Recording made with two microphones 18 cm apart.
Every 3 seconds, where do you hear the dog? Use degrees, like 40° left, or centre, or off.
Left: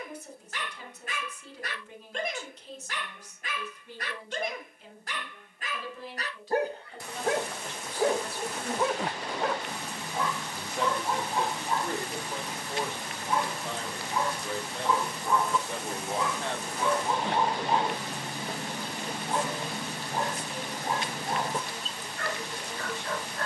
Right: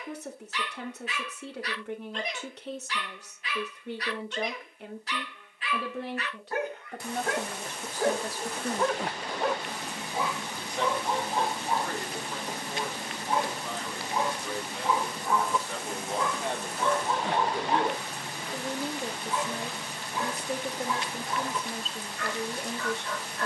50° left, 50° left, 20° left, 10° right, 20° right, 10° left, 40° left, 40° left.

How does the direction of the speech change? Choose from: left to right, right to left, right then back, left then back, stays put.
left then back.